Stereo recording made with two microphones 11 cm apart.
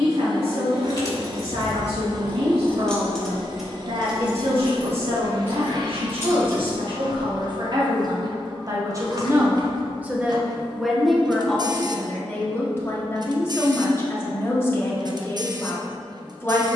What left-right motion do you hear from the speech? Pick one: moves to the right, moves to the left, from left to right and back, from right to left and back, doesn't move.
moves to the left.